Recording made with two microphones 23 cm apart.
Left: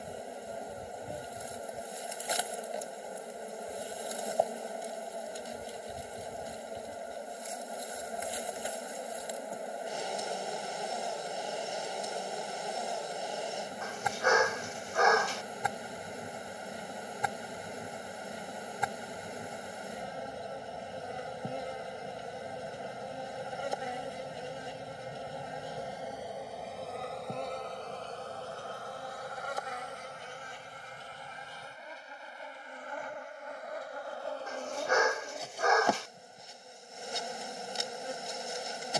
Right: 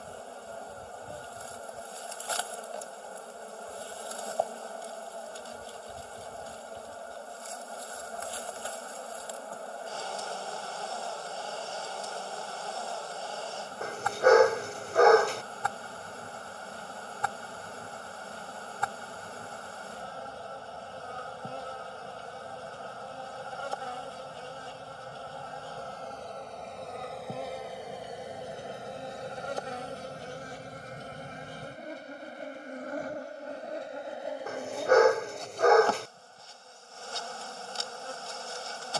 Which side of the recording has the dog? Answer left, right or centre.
right.